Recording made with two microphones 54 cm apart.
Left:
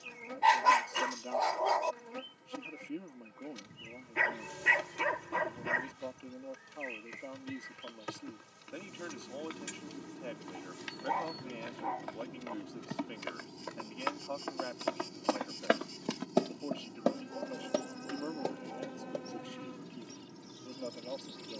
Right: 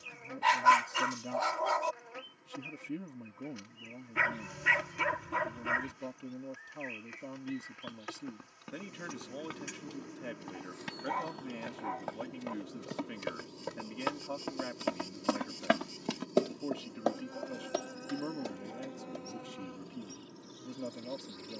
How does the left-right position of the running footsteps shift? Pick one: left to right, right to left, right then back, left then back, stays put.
right to left.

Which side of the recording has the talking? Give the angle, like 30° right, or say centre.
40° right.